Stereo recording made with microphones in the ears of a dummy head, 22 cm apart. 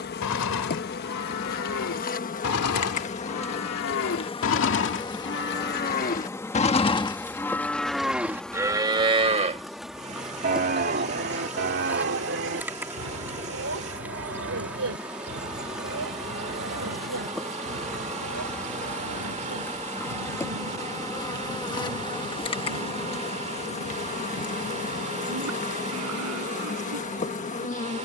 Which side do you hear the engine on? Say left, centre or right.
right.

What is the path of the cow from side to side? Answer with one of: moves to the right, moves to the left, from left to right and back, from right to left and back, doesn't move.
moves to the right.